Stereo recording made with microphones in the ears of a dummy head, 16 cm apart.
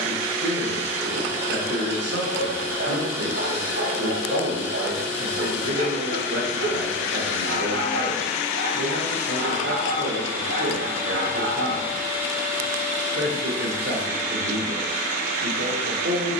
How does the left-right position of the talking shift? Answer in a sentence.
You can hear the talking stay put.